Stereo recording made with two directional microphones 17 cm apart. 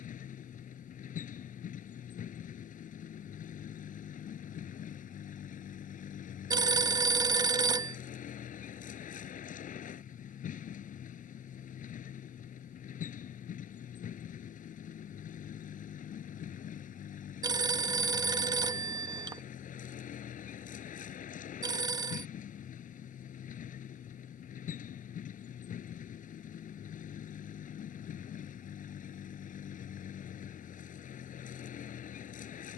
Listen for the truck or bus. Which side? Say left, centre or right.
left.